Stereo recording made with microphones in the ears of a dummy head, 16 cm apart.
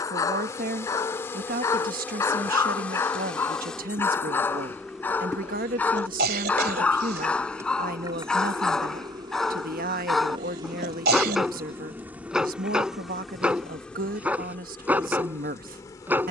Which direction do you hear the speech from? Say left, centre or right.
right.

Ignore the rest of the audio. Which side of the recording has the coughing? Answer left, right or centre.
right.